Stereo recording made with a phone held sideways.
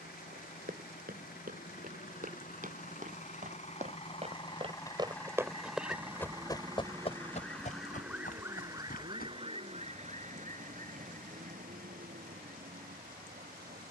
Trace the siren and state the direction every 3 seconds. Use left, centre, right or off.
left, left, centre, right, right.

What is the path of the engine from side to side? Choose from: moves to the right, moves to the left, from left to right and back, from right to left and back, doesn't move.
moves to the right.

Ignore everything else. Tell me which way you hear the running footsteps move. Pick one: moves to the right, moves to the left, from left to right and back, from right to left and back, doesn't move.
moves to the left.